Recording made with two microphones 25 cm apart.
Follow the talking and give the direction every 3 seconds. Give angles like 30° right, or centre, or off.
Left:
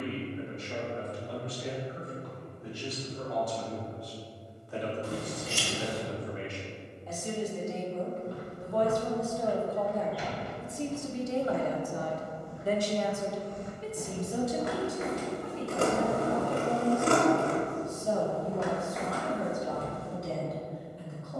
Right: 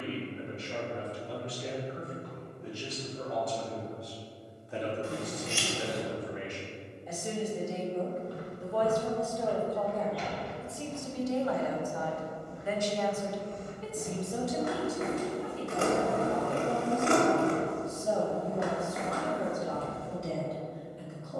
30° right, 20° right, 10° right, 20° left, 20° left, 10° right, 30° right.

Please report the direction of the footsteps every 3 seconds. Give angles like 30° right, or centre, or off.
off, off, 20° left, centre, 30° right, 50° right, centre.